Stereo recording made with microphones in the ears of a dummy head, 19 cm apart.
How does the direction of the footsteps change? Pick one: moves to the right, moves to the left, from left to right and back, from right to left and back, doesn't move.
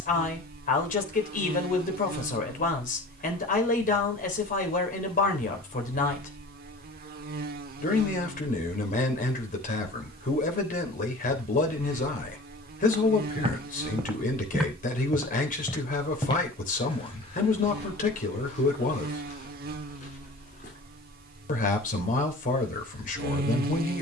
moves to the left.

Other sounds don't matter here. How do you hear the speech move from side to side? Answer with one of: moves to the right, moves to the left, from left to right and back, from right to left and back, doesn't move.
doesn't move.